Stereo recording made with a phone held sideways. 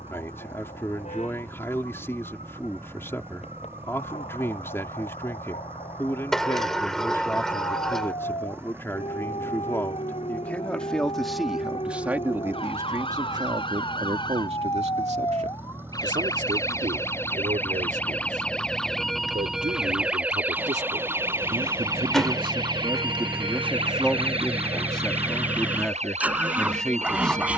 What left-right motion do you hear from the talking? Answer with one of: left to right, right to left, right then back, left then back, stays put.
right then back.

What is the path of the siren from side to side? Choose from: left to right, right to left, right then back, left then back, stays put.
left to right.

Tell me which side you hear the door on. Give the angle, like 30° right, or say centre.
centre.